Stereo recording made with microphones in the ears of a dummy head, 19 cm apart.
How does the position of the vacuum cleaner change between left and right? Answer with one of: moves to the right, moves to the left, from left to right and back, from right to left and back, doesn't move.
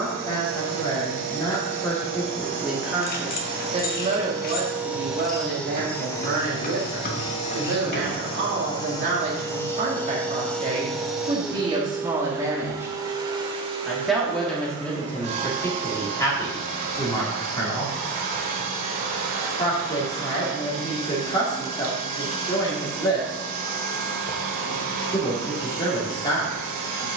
from right to left and back.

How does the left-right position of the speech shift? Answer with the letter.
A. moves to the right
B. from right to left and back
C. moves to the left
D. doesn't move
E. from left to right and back
E.